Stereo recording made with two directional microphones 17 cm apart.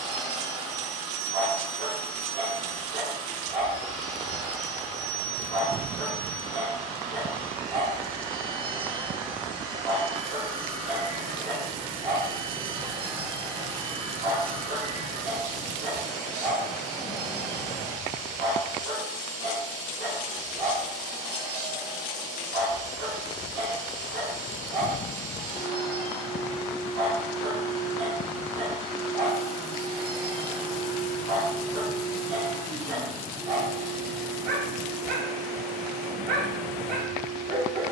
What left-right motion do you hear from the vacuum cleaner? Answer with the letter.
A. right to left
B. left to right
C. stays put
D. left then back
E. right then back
C.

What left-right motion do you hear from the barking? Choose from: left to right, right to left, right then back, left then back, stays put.
stays put.